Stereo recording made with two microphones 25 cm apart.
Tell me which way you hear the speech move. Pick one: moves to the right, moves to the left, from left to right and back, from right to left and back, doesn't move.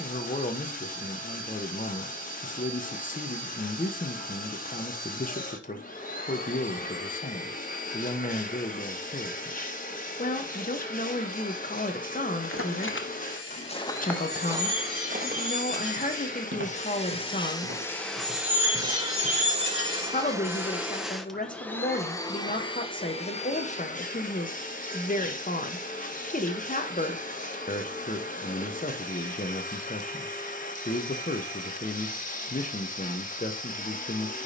doesn't move.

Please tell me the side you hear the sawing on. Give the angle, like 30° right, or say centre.
50° left.